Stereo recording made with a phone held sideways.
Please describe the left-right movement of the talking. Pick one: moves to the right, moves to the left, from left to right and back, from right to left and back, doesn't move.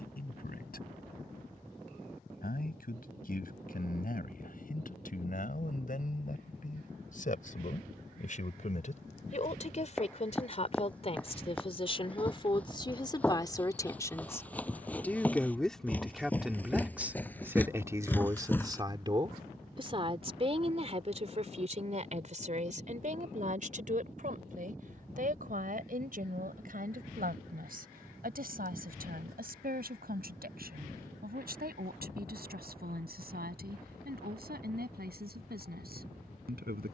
moves to the right.